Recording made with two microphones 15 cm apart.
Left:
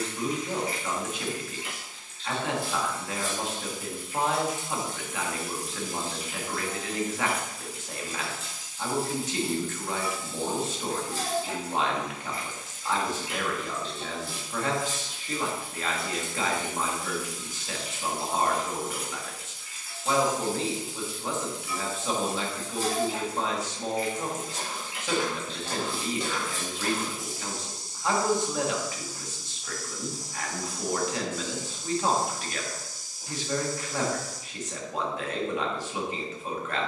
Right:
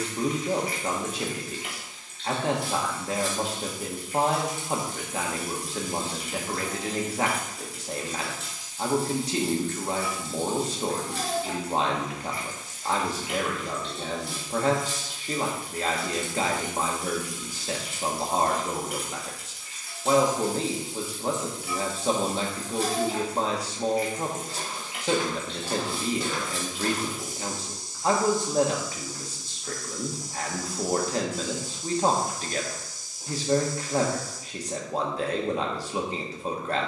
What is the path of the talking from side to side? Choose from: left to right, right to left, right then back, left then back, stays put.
stays put.